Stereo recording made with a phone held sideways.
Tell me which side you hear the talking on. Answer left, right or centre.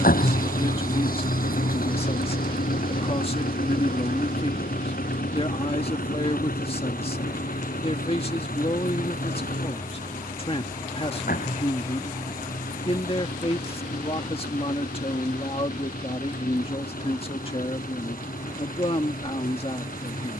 left.